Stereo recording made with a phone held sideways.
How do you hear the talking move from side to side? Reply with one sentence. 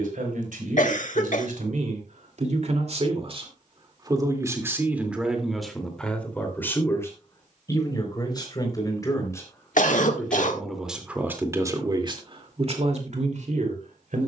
You can hear the talking move from right to left and back again.